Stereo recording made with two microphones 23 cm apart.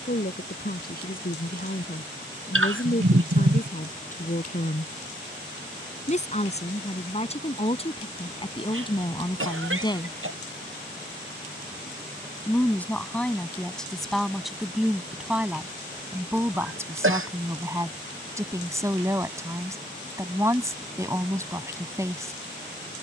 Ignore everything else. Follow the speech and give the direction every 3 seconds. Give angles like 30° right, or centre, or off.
40° left, 40° left, 30° left, 20° left, centre, 10° right, 10° right, 10° right.